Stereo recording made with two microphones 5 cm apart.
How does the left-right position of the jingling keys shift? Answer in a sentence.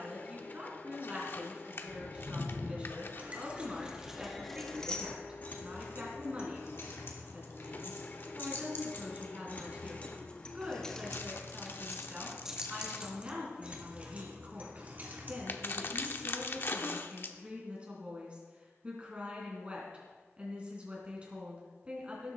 In this clip you hear the jingling keys go left and come back.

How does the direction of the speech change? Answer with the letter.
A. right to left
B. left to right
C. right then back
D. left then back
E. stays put
E.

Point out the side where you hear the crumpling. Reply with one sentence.
In this clip you hear the crumpling on the left.